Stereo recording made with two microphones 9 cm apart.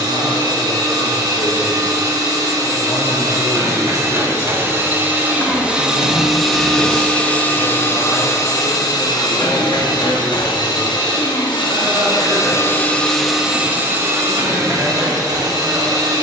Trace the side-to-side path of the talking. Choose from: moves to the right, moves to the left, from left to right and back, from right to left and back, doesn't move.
moves to the right.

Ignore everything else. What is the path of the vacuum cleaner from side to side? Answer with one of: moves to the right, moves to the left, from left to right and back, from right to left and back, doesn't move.
from right to left and back.